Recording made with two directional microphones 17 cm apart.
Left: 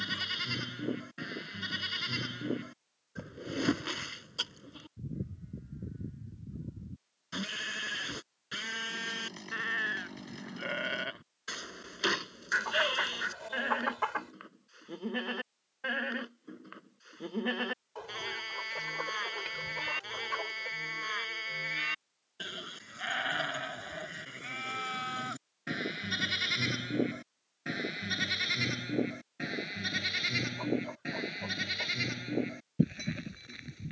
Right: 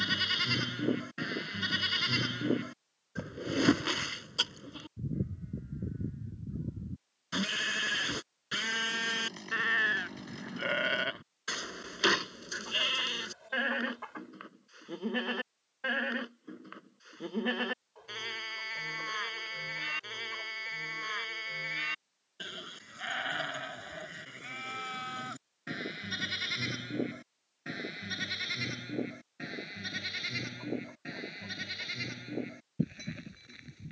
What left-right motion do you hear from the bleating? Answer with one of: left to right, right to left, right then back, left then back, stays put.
right to left.